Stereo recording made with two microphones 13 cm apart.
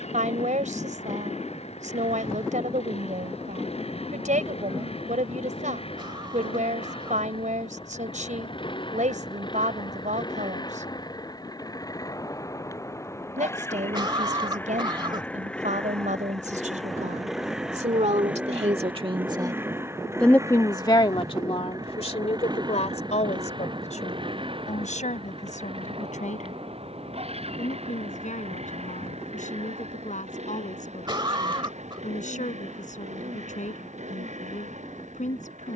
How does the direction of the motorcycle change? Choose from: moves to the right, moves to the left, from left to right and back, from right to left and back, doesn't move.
moves to the right.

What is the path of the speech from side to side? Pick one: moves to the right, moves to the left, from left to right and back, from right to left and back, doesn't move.
moves to the left.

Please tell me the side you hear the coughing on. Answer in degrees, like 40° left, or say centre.
40° right.